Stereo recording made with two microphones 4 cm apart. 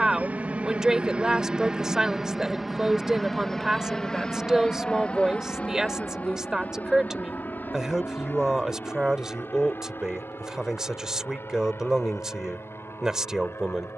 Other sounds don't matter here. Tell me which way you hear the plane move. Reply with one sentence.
You can hear the plane travel towards the left.